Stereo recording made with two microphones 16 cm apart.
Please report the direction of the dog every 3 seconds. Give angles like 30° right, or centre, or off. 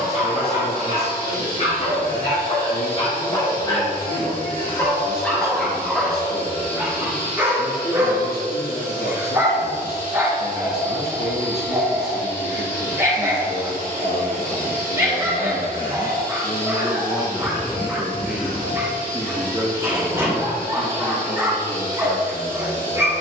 50° left, 20° left, 10° right, 20° right, 20° right, 20° right, 20° right, 20° right.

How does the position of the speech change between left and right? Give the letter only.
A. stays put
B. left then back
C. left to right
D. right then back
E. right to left
C.